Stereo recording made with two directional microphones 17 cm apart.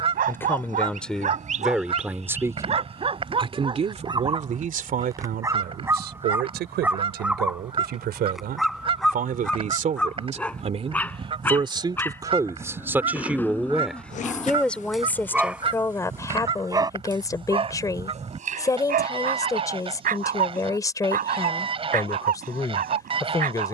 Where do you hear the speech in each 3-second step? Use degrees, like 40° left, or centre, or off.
centre, 50° right, 60° right, 40° right, 10° right, 20° left, 20° left, 20° left.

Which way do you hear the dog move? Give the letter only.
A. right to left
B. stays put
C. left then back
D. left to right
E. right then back
C.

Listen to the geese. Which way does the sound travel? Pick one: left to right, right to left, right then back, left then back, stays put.
stays put.